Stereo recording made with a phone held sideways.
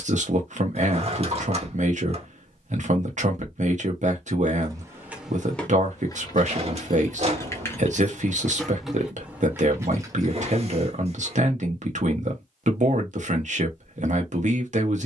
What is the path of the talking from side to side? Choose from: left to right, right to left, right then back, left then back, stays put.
stays put.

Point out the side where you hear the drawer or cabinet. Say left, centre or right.
right.